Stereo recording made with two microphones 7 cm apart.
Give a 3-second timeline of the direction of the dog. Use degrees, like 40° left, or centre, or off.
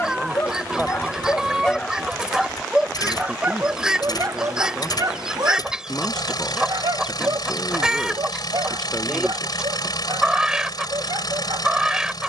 20° left, 40° right, 70° right, 80° right.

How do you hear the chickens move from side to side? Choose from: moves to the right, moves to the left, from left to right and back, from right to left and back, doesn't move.
doesn't move.